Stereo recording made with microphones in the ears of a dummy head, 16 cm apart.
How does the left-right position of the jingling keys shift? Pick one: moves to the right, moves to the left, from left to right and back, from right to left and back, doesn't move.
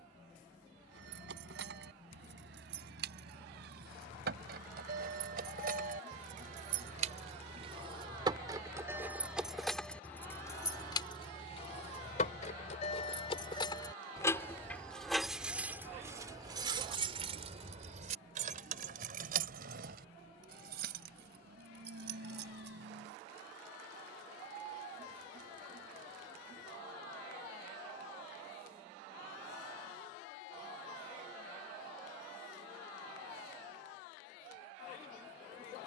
from right to left and back.